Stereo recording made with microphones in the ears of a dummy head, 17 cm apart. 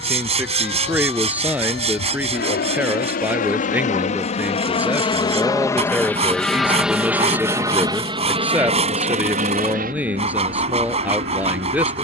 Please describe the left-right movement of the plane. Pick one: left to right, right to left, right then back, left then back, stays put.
left to right.